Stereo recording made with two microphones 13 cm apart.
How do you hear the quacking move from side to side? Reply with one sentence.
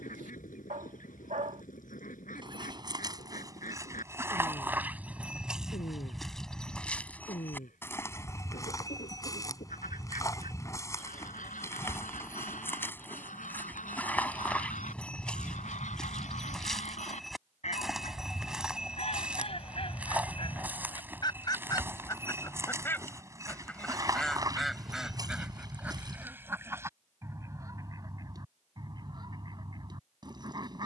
You can hear the quacking go from the left side to the right.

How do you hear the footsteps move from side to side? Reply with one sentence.
In this clip you hear the footsteps go left and come back.